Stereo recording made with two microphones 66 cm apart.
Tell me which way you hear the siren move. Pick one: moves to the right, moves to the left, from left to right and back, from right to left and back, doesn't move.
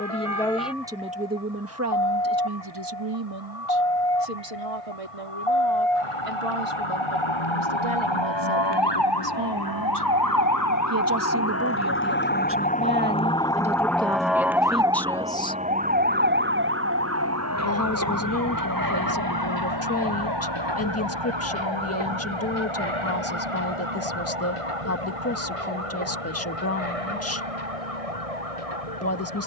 moves to the right.